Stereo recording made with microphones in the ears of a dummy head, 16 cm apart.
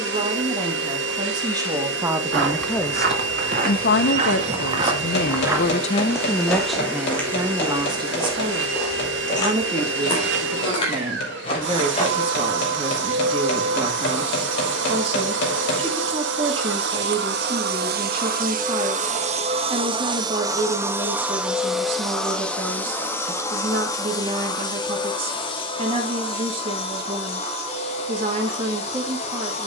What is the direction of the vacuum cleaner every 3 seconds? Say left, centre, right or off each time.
right, right, right, right, right, right, right, centre, left, left.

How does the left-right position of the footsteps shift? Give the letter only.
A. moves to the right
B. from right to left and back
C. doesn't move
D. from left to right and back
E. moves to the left
E.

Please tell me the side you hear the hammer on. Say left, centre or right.
left.